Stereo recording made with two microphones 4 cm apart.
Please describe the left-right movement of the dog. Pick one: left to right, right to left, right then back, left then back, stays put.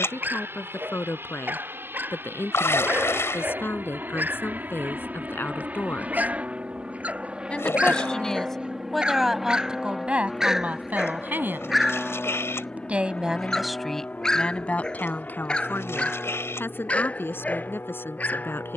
right to left.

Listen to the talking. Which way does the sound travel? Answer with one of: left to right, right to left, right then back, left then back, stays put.
right then back.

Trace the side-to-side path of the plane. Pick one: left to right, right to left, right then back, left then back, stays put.
right to left.